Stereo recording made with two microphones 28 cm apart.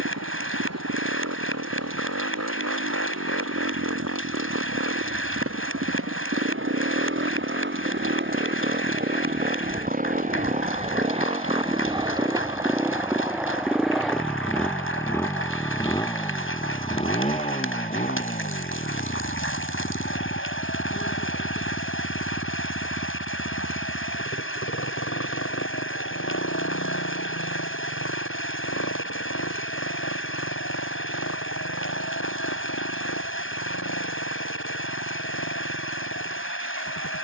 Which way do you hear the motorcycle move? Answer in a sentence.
You can hear the motorcycle move to the left.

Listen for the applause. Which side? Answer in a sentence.
You can hear the applause on the left.